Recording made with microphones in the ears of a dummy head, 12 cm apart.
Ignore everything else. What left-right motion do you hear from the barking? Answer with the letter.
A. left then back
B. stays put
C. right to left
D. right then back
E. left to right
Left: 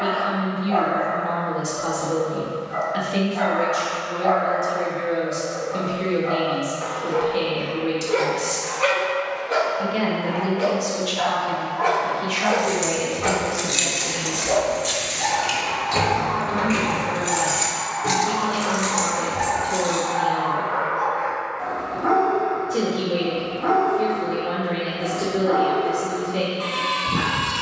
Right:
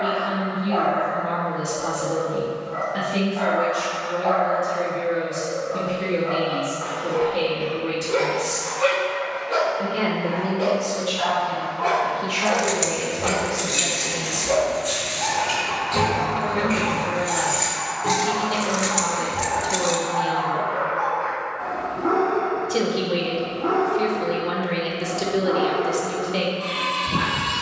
B.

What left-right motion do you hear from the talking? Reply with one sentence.
You can hear the talking move from left to right.